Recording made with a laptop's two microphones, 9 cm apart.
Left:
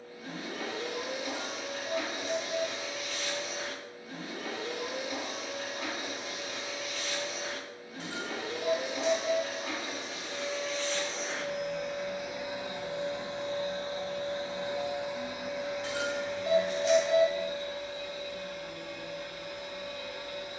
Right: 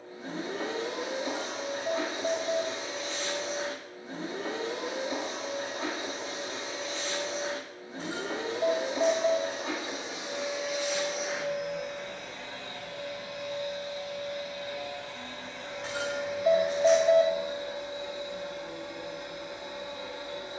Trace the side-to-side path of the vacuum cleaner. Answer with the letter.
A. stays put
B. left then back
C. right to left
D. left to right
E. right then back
B.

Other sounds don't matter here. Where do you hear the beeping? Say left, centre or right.
right.